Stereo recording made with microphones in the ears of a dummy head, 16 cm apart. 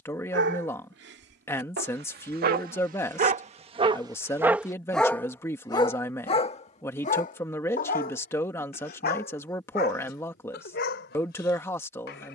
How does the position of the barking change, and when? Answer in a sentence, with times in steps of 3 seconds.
You can hear the barking on the right from 0 s, in the centre from 3 s and on the left from 6 s.